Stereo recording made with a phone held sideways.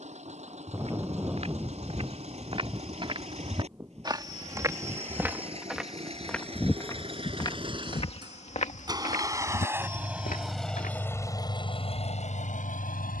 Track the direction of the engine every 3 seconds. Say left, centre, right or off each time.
right, right, right, centre, left.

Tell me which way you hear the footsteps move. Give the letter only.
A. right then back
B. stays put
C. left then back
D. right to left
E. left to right
D.